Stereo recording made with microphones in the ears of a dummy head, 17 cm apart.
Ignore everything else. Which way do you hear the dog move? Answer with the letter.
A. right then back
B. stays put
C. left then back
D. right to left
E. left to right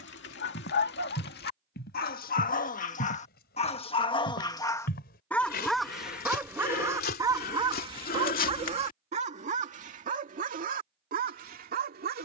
E.